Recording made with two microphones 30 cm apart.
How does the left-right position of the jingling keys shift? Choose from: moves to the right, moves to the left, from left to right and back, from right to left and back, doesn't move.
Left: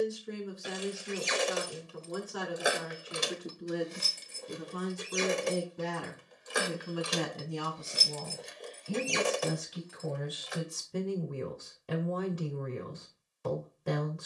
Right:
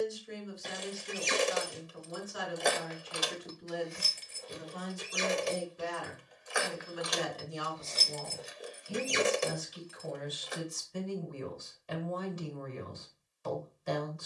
from right to left and back.